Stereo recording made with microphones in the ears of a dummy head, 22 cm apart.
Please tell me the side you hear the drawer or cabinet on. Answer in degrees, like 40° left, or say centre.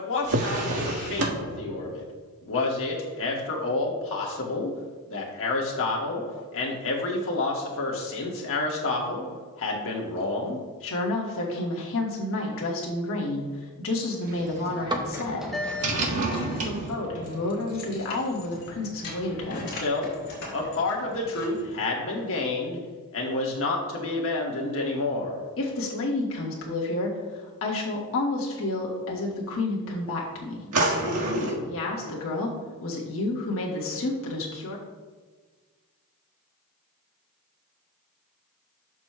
60° right.